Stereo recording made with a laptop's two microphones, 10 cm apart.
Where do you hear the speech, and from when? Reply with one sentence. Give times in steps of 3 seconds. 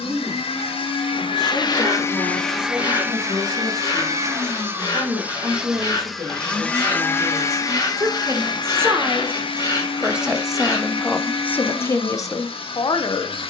In this clip you hear the speech on the right from 0 s, in the centre from 9 s and on the left from 12 s.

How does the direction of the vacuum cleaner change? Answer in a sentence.
You can hear the vacuum cleaner go right and come back.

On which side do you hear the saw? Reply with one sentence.
You can hear the saw on the left.